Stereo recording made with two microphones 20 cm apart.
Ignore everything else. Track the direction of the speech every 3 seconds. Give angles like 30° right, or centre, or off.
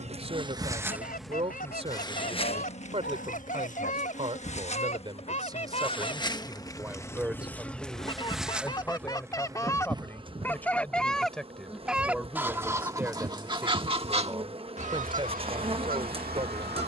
30° right, 30° right, 10° right, 10° left, 10° right, 30° right.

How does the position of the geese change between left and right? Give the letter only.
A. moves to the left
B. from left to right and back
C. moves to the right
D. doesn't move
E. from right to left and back
C.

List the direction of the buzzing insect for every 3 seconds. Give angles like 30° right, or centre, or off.
10° left, 40° left, 10° left, 20° right, 30° right, 30° right.